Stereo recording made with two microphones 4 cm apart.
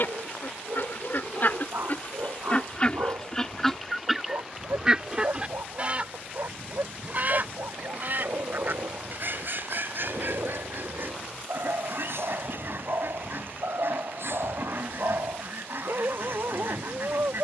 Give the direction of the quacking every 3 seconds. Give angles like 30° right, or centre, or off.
40° left, 10° right, 40° right, 60° right, 60° right, 60° right.